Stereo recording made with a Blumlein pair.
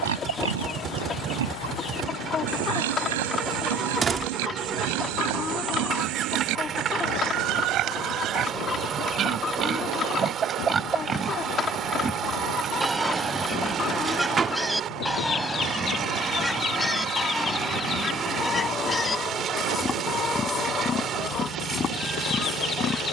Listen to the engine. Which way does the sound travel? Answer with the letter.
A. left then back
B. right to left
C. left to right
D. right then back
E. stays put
E.